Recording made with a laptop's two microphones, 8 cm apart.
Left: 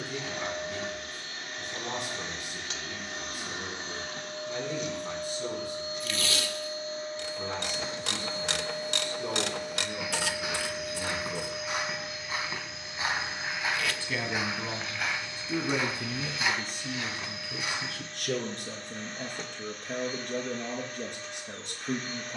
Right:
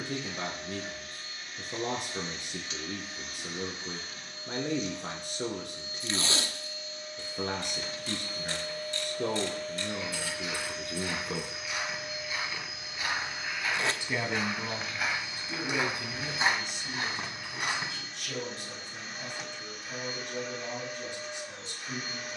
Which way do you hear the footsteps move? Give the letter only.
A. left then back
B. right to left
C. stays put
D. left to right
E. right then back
D.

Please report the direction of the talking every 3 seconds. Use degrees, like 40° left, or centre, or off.
60° right, 60° right, 60° right, 60° right, centre, 40° left, 60° left, 60° left.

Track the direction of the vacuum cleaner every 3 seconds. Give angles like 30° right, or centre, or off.
70° left, 60° left, 40° left, 10° left, 10° right, 10° right, 10° right, 10° right.